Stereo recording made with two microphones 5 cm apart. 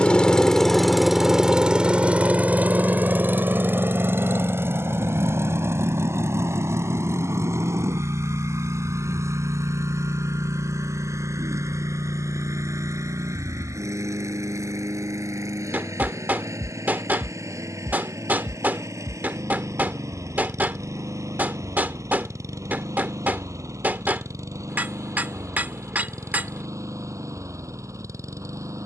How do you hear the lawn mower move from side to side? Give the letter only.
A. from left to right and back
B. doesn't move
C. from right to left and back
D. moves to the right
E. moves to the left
D.